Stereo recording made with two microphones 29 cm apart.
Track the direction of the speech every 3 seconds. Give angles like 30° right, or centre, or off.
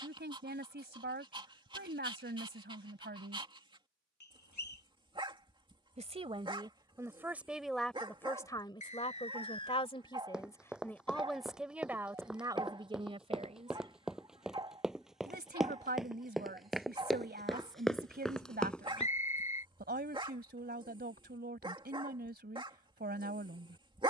40° right, 40° right, centre, 10° left, 20° right, 30° right, 30° right, 30° right.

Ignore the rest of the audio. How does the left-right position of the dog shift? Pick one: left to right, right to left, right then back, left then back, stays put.
stays put.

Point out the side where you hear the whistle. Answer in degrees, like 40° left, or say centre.
80° left.